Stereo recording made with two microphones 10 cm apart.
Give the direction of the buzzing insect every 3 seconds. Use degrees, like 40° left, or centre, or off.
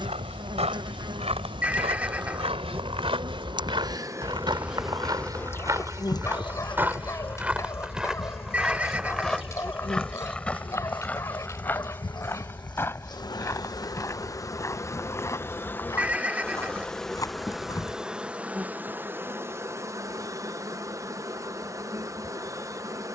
50° right, 10° right, 50° left, 50° left, 40° left, 10° left, 20° right, 30° right.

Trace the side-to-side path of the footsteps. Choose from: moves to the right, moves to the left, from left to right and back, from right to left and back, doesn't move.
moves to the left.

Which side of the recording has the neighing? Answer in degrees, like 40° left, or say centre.
10° right.